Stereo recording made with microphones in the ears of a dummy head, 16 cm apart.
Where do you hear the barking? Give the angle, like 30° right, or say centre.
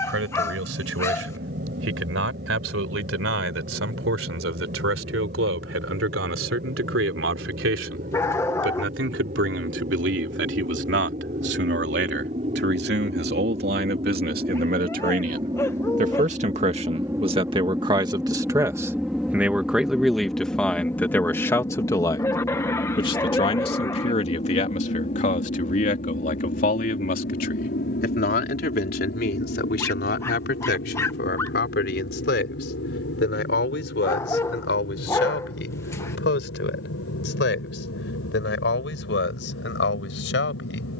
20° left.